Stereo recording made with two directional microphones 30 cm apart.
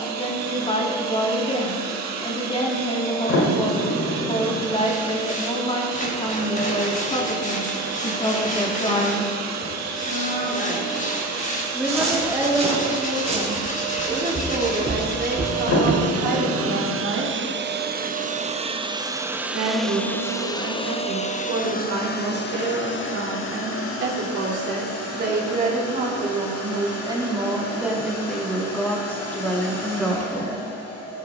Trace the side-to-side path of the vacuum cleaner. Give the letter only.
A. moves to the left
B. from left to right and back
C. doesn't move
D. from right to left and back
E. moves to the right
A.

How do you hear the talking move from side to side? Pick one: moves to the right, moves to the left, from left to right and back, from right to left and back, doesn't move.
from left to right and back.